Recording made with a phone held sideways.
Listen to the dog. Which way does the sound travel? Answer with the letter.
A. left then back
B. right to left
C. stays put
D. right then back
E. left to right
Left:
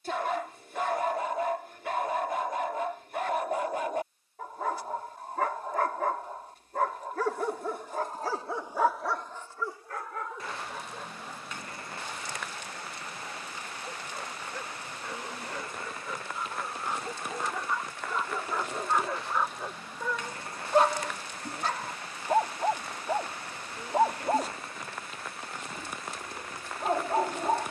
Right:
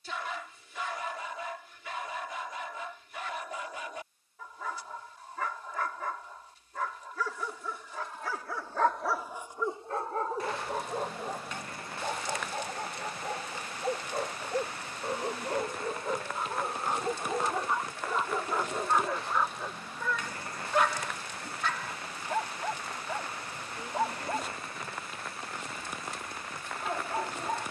D.